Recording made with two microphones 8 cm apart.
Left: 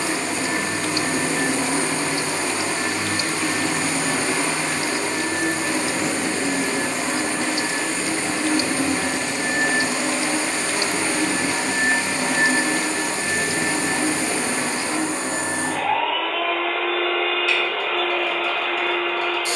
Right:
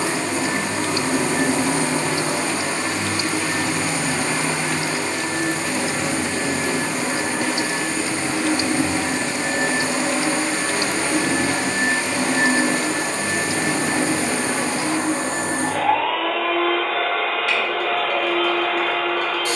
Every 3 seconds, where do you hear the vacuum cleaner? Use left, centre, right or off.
right, centre, centre, right, right, right, right.